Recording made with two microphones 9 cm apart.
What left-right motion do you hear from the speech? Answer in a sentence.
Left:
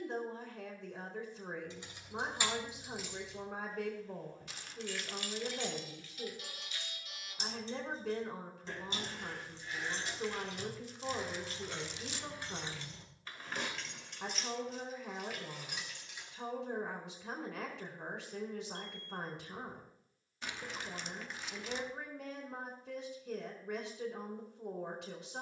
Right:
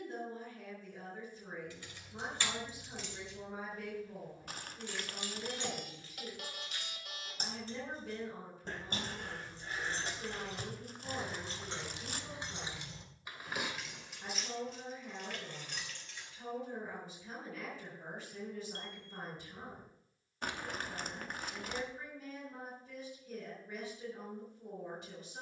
In this clip you hear the speech stay put.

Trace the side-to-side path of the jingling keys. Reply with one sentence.
You can hear the jingling keys go right and come back.